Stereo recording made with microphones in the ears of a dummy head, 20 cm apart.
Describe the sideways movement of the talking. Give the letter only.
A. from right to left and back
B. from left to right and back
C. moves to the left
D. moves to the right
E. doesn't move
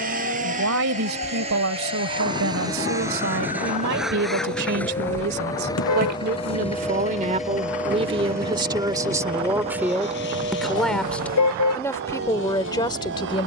C.